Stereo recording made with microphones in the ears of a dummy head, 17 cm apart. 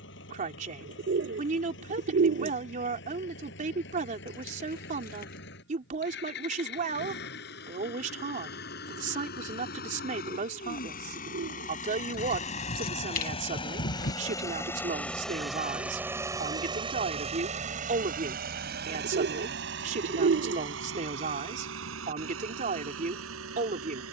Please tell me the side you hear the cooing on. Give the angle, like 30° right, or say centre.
60° right.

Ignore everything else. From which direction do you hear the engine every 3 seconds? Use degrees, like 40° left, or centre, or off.
70° left, 60° left, 60° left, 50° left, 30° left, 20° right, 60° right, 80° right.